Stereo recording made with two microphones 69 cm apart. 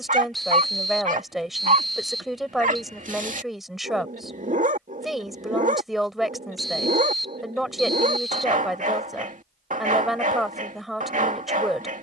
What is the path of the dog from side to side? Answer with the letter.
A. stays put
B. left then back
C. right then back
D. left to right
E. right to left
A.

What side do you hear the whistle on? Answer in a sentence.
You can hear the whistle in the centre.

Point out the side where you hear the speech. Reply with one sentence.
You can hear the speech in the centre.